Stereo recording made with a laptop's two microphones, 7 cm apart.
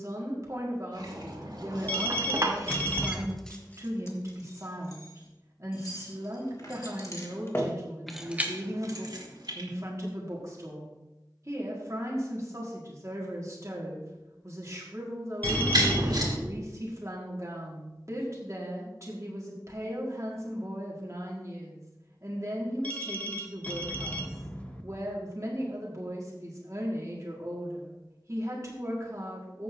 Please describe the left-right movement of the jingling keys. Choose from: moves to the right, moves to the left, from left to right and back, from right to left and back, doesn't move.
from right to left and back.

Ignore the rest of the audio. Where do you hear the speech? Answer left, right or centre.
right.